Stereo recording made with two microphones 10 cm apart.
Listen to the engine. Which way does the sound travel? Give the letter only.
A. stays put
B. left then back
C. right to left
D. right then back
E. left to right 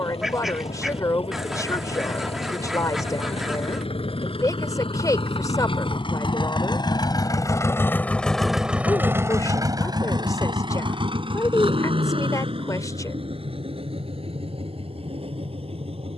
E.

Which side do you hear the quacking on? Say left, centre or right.
centre.